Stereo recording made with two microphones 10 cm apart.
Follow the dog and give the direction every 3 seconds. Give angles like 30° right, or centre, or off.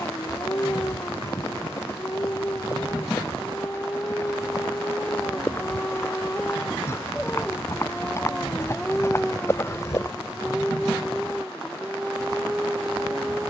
20° left, 20° left, 10° left, centre, 10° right.